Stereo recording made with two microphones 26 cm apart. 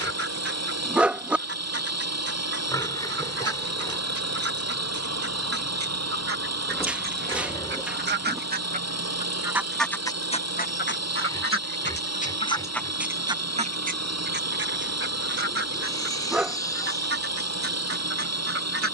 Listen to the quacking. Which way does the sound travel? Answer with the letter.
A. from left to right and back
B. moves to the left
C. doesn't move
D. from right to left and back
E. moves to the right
D.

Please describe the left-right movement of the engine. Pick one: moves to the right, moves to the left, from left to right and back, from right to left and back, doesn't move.
doesn't move.